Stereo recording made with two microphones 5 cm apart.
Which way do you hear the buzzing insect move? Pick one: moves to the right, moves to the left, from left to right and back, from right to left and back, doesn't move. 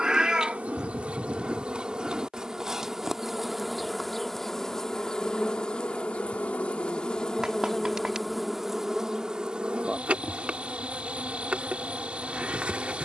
from right to left and back.